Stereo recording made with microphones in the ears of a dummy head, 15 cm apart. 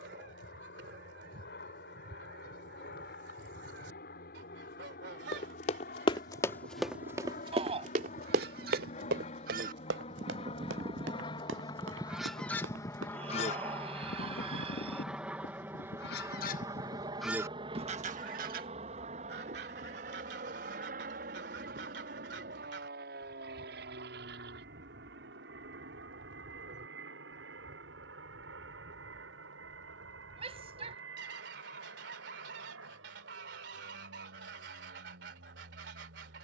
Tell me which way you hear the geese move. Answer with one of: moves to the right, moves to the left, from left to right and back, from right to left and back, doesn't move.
from right to left and back.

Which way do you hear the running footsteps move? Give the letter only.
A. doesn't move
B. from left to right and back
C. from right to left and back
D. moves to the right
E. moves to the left
D.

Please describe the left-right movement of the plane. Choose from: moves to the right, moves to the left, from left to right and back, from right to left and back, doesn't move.
moves to the right.